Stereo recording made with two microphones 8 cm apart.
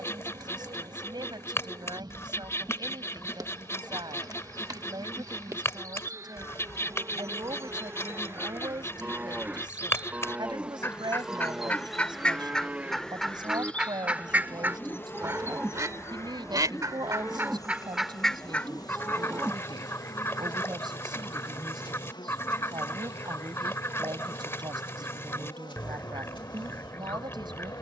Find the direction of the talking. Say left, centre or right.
right.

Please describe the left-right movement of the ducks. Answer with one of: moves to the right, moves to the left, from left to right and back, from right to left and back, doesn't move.
from left to right and back.